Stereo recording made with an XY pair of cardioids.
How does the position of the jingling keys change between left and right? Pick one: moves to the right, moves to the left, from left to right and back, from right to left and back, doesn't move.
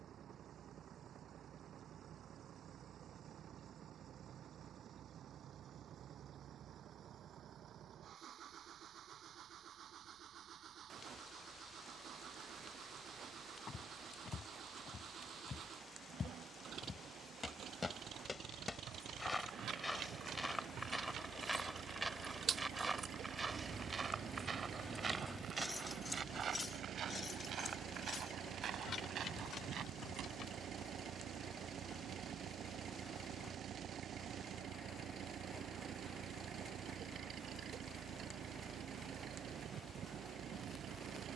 moves to the left.